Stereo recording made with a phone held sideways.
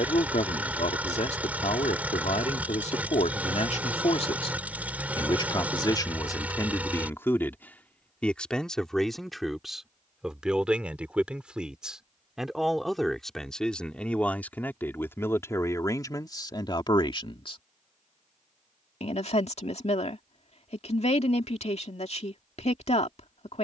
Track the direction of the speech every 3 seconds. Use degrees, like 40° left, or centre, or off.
60° left, 40° left, 20° left, centre, 10° left, 30° left, 50° left, 50° left.